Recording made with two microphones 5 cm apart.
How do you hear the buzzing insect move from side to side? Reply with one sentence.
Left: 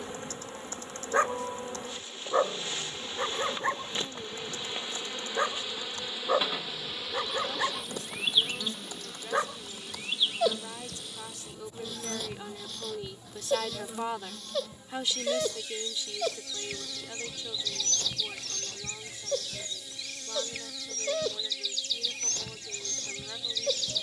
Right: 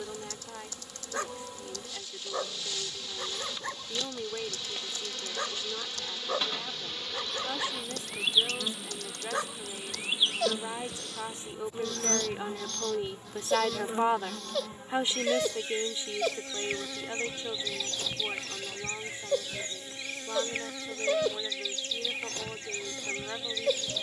In this clip you hear the buzzing insect move to the right.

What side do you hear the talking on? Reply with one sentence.
You can hear the talking on the right.